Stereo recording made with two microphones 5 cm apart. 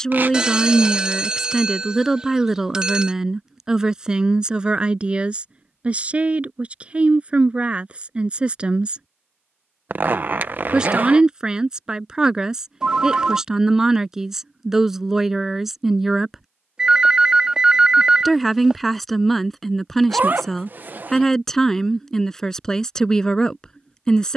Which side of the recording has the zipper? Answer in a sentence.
You can hear the zipper on the right.